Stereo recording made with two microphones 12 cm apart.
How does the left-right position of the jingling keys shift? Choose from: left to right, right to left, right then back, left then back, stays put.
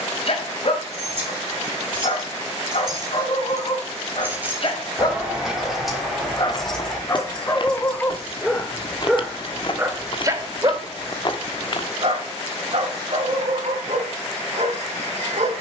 right to left.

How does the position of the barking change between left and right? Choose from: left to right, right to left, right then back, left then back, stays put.
left to right.